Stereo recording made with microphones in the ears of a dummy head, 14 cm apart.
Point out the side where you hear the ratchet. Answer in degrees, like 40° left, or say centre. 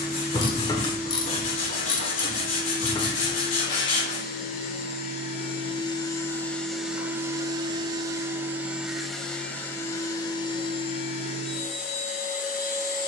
30° left.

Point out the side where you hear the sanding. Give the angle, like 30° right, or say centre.
40° left.